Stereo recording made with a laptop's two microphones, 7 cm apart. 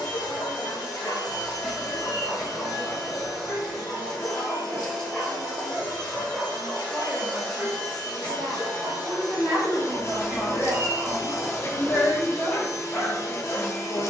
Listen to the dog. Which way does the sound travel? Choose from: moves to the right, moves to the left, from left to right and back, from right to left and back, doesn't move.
from left to right and back.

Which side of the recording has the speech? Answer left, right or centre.
left.